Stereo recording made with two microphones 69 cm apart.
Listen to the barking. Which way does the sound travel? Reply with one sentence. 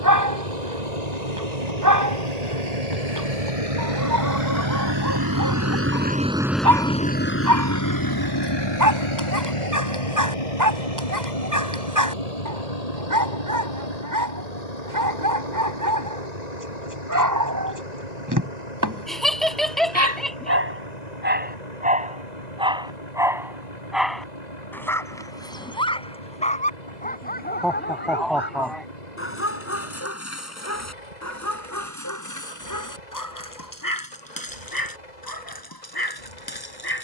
You can hear the barking travel towards the left.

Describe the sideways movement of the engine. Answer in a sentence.
In this clip you hear the engine go from the right side to the left.